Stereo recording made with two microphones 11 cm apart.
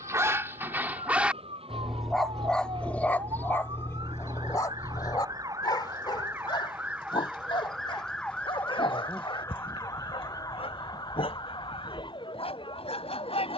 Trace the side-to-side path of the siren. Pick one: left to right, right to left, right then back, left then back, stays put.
right to left.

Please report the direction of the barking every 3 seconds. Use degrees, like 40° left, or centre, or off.
10° right, 30° left, 50° left, 60° left, 60° left.